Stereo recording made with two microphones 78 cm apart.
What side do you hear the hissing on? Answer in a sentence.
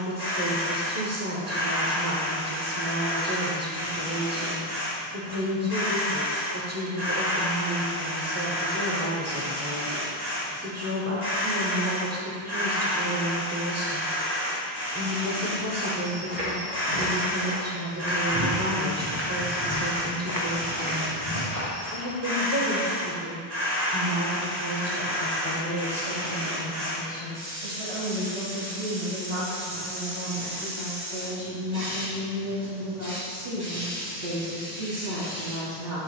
In this clip you hear the hissing on the right.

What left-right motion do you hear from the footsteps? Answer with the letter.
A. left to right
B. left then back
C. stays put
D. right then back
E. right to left
E.